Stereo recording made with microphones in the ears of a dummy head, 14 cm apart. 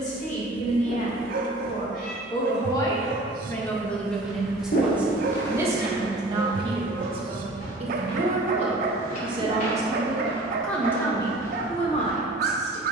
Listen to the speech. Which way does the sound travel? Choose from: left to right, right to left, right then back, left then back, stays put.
right then back.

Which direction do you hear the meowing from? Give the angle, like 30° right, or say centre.
60° left.